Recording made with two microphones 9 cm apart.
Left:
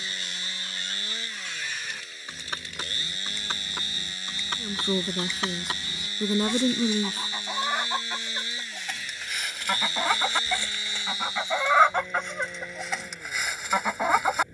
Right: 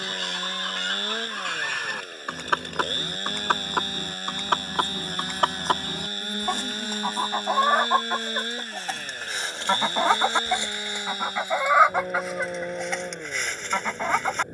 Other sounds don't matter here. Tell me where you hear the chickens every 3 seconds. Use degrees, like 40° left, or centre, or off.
70° right, 60° right, 50° right, 20° right, 10° left.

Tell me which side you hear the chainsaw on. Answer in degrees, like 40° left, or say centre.
50° right.